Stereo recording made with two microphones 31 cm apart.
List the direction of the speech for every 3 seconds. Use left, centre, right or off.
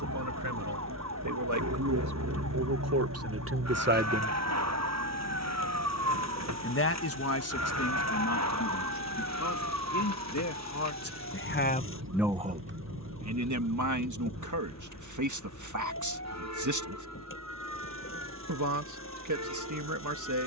right, right, left, left, right, right, right.